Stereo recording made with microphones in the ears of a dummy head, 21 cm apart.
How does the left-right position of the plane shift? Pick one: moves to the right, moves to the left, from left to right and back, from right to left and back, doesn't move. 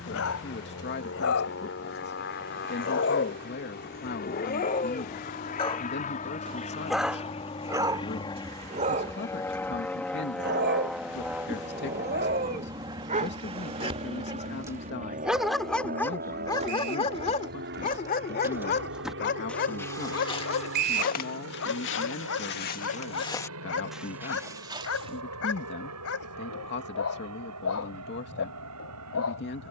moves to the right.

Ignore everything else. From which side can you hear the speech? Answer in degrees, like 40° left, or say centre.
50° left.